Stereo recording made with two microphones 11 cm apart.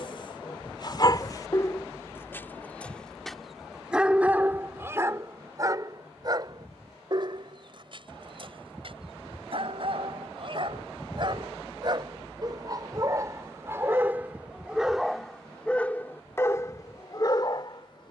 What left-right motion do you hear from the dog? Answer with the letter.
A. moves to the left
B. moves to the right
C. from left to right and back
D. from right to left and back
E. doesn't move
C.